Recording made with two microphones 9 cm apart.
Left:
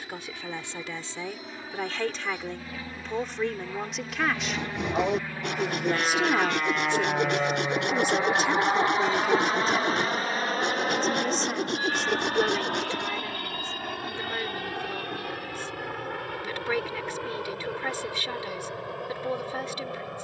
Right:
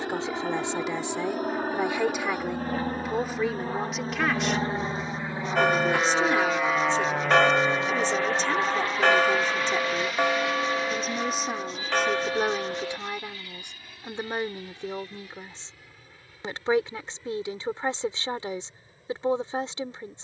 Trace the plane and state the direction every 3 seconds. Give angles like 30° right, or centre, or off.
60° right, 30° right, 10° left, 40° left, 60° left, 60° left, 70° left.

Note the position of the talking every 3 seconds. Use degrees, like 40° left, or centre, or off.
20° right, centre, 10° left, centre, 20° right, 30° right, 30° right.